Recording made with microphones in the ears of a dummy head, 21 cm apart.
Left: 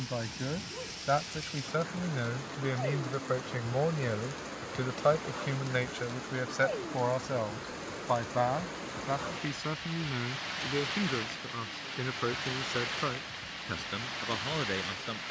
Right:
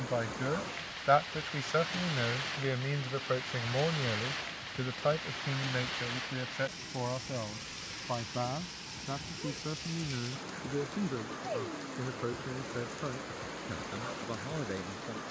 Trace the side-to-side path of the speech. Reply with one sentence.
In this clip you hear the speech travel towards the left.